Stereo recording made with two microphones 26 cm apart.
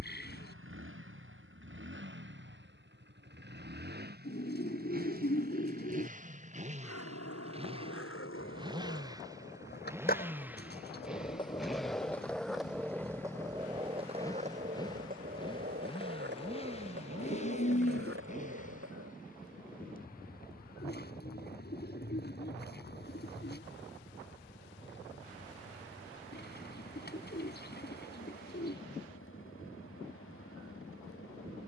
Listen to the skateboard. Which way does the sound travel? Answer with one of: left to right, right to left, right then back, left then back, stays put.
left to right.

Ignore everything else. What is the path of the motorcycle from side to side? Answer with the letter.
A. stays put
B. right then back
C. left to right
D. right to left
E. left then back
D.